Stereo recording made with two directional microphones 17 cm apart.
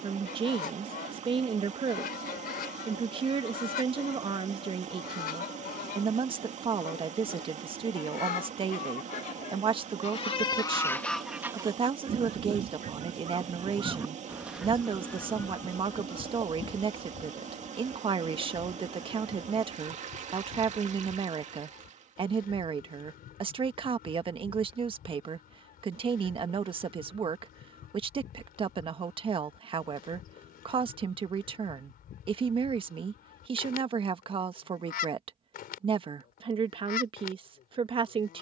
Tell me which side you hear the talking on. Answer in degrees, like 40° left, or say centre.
30° right.